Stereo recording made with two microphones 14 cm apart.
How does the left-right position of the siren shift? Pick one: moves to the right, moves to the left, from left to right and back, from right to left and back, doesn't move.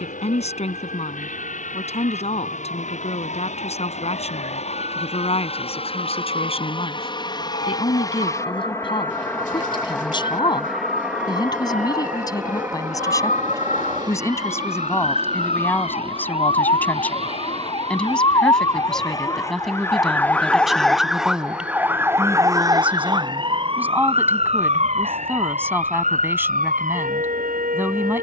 moves to the right.